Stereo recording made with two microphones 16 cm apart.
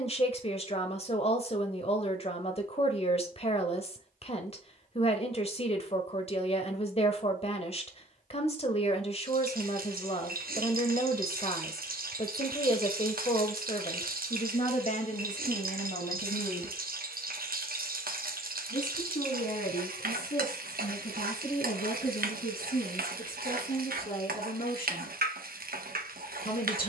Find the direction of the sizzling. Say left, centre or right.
right.